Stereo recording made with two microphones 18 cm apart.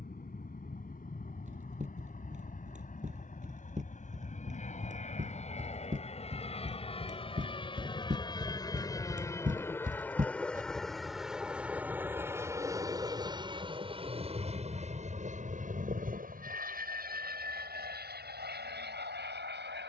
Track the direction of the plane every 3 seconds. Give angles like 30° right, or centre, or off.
50° left, 40° left, 30° left, 10° left, 20° right, 50° right, 60° right.